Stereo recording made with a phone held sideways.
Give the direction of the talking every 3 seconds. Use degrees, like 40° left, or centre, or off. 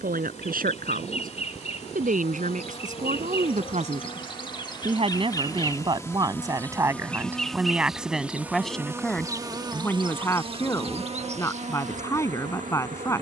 60° right, 40° right, 10° right, 20° left, 20° left.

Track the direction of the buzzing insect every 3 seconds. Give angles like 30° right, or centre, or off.
50° left, 30° left, centre, 40° right, 60° right.